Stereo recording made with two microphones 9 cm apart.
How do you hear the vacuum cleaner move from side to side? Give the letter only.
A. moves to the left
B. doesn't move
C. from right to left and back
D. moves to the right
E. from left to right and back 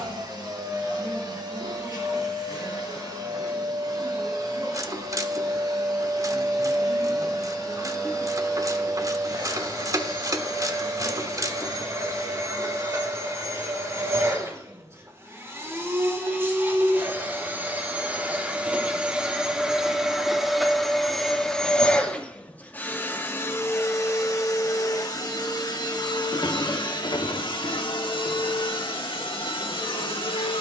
A.